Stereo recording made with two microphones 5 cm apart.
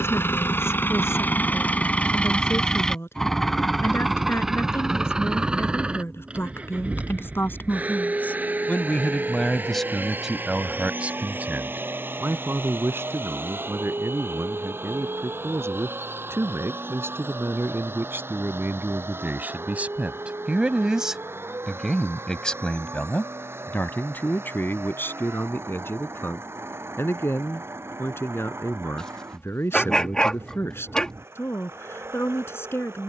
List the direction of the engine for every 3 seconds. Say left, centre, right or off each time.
left, centre, right, right, right, right, right, right, right, right, right.